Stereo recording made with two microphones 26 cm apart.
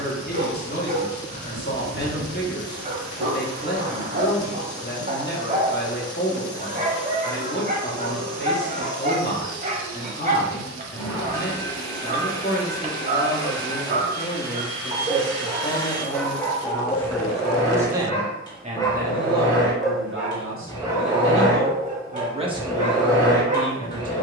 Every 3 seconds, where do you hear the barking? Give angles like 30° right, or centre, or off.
30° right, 30° right, 30° right, 30° right, 30° right, 10° left, 10° left, 20° right.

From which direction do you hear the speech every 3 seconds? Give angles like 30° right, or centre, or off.
40° left, 40° left, 40° left, 40° left, 40° left, 20° left, 40° right, 10° right.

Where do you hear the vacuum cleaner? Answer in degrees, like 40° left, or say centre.
20° left.